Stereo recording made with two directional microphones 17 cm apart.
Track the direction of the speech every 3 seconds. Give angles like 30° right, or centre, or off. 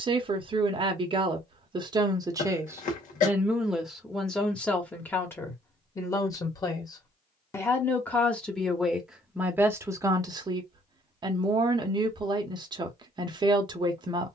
30° right, centre, 10° left, 20° right, 30° right.